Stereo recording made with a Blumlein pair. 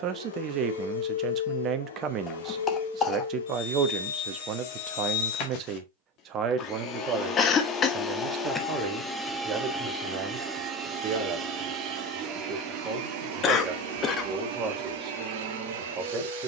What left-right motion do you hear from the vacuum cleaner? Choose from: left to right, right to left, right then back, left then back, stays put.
left to right.